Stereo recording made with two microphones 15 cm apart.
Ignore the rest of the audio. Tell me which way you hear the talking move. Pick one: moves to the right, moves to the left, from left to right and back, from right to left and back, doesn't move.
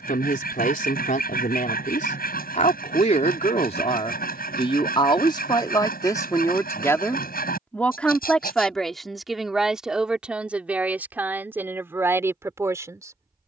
moves to the right.